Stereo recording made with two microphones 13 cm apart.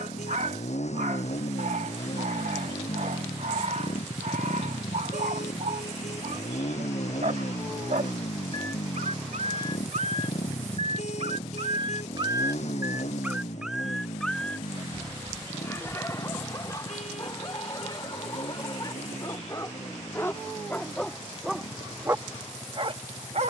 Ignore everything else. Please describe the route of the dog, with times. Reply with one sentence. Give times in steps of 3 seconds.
You can hear the dog on the right from 0 s, in the centre from 12 s, on the left from 15 s and on the right from 21 s.